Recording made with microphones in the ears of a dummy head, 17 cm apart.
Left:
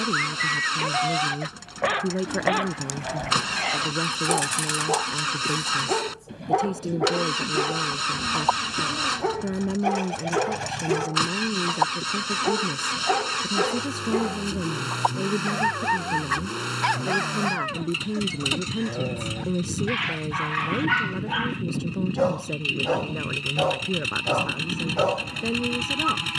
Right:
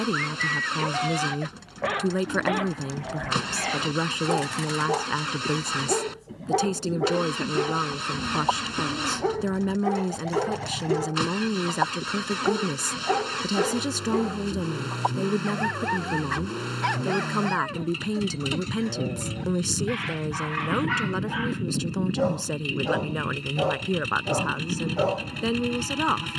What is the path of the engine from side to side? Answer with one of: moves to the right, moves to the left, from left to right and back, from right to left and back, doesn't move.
doesn't move.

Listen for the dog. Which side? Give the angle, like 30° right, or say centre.
30° left.